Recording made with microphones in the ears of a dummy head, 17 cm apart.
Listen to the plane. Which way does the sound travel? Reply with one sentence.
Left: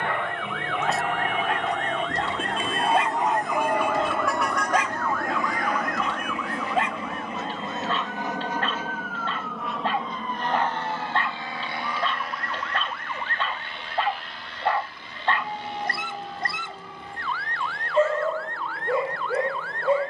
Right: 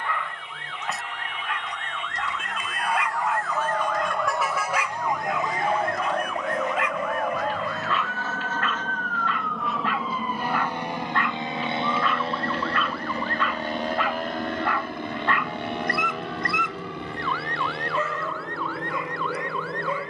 In this clip you hear the plane move from left to right.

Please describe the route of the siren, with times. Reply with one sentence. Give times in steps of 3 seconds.
In this clip you hear the siren on the left from 0 s, in the centre from 3 s and on the right from 6 s.